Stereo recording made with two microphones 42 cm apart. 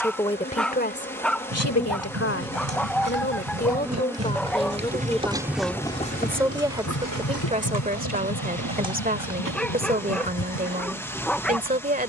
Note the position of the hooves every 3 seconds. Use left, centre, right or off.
right, right, left, left.